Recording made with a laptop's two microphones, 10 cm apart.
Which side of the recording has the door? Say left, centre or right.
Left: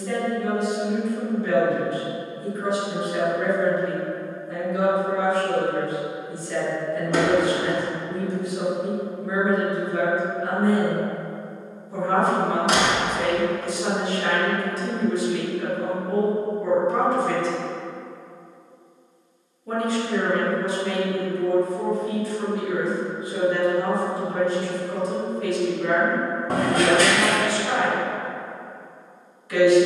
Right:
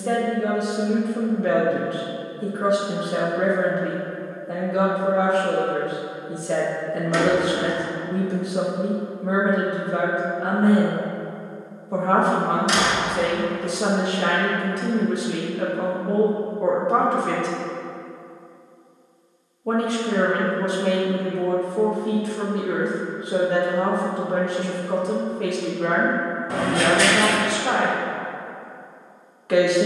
left.